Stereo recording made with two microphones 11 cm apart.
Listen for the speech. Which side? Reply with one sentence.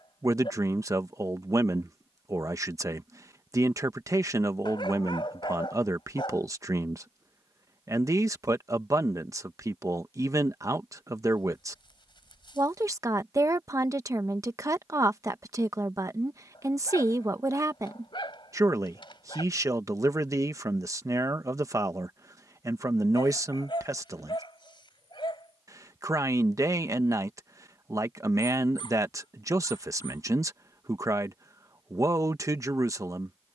You can hear the speech on the right.